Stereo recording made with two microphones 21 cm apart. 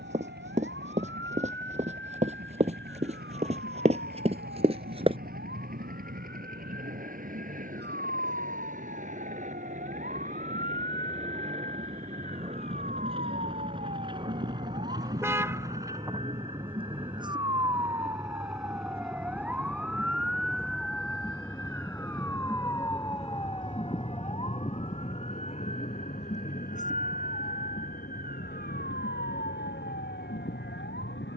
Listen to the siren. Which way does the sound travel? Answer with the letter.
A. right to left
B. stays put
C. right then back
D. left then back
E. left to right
A.